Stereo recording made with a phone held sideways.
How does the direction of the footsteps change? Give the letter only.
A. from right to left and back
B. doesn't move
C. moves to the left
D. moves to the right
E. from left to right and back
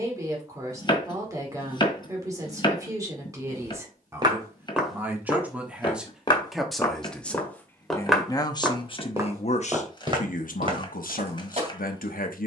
A.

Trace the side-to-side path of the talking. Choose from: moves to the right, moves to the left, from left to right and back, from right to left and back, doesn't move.
moves to the left.